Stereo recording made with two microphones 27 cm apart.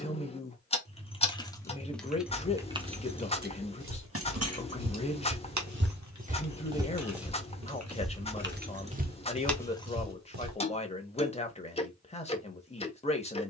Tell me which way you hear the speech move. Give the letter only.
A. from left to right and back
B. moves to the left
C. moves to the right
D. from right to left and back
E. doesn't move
E.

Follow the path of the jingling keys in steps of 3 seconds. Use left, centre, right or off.
centre, right, right, centre, off.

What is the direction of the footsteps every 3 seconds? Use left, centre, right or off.
off, right, centre, right, off.